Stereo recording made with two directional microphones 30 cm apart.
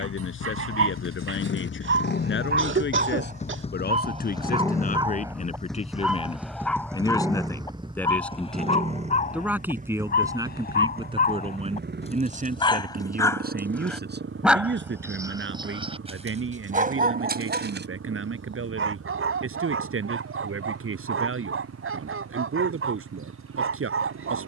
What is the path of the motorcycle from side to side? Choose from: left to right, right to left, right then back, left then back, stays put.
left to right.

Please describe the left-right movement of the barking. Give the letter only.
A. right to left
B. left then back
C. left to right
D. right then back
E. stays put
B.